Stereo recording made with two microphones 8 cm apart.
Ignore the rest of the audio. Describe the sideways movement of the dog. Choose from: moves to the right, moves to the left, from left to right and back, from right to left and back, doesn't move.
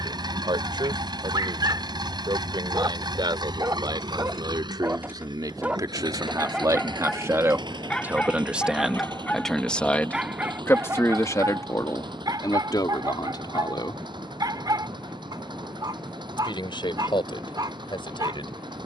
from right to left and back.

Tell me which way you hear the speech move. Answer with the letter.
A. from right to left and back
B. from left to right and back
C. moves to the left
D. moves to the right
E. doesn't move
C.